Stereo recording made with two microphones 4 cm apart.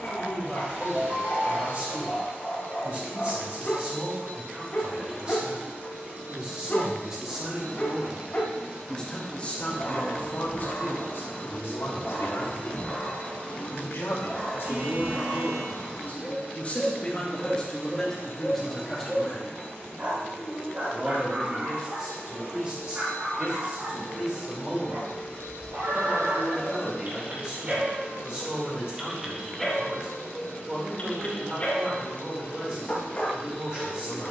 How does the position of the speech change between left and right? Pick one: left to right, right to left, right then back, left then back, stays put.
left then back.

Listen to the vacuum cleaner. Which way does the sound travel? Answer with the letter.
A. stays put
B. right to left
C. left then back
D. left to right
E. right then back
B.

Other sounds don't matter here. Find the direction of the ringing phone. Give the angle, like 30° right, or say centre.
50° right.